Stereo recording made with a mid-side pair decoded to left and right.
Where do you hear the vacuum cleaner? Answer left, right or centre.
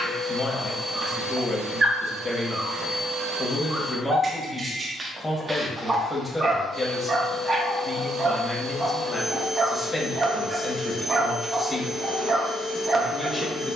right.